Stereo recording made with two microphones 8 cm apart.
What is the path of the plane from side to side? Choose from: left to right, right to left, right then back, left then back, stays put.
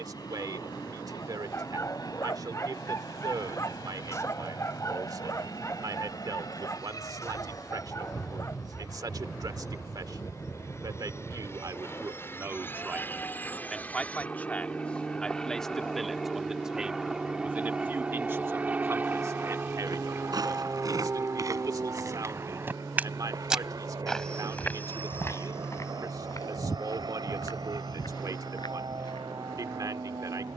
left to right.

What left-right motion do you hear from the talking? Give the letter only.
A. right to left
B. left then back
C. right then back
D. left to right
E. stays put
B.